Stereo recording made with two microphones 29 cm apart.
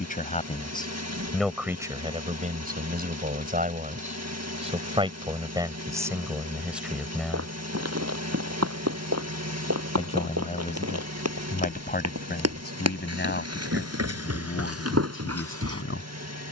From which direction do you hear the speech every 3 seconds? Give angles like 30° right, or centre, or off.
centre, 20° right, centre, 30° left, 40° left, 50° left.